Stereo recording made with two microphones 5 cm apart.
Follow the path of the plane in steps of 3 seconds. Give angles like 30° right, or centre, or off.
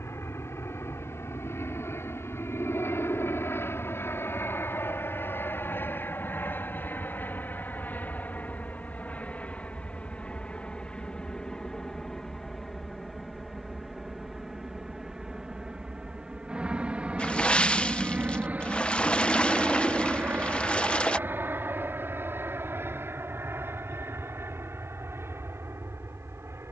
60° left, 50° left, 40° left, 20° left, centre, 20° right, 30° right, 40° right, 50° right.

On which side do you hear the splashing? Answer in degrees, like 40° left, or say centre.
20° left.